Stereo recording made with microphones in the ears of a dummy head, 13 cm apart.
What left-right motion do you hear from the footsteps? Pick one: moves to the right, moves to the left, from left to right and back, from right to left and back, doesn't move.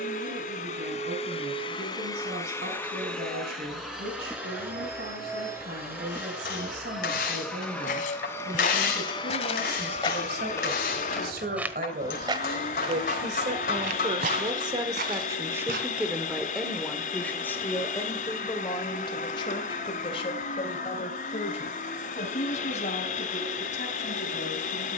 moves to the right.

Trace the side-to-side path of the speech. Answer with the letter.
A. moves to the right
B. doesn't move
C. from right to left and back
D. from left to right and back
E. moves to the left
E.